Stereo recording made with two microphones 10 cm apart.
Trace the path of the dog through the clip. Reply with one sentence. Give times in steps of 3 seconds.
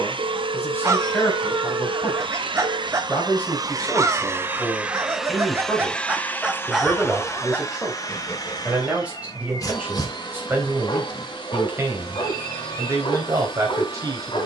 You can hear the dog on the right from 0 s, in the centre from 6 s and on the left from 9 s.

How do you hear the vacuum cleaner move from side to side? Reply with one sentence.
You can hear the vacuum cleaner travel towards the left.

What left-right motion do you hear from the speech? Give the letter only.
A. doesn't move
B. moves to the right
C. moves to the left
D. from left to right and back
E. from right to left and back
B.